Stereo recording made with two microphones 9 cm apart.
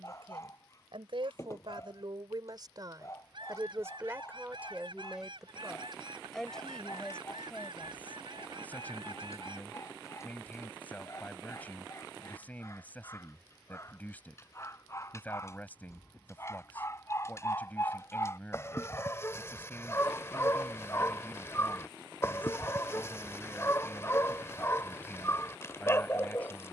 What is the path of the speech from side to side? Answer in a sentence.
In this clip you hear the speech go from the right side to the left.